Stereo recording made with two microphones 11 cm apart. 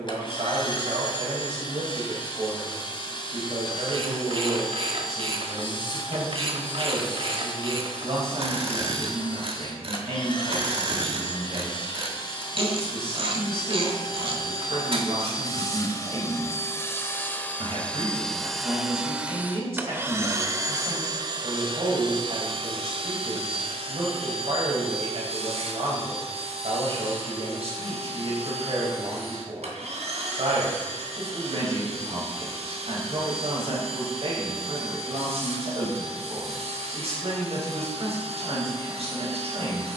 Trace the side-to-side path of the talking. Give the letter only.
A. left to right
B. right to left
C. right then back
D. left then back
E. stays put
E.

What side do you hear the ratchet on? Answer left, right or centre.
right.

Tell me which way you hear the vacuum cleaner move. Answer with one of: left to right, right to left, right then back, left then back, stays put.
left to right.